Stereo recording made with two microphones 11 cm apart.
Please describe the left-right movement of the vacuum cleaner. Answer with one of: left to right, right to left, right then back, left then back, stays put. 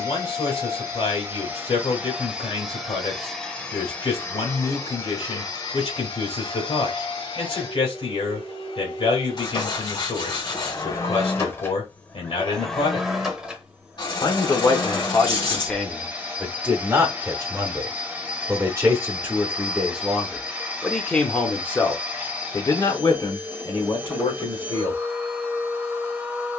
left then back.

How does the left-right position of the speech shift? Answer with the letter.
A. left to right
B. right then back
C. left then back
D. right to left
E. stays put
B.